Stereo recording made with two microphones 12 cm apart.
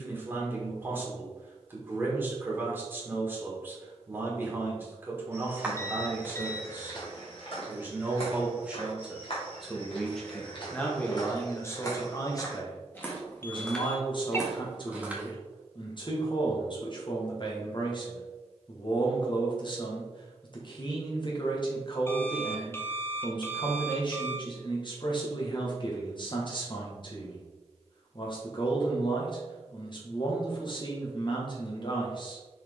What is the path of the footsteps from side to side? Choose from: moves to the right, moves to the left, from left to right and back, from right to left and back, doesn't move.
from right to left and back.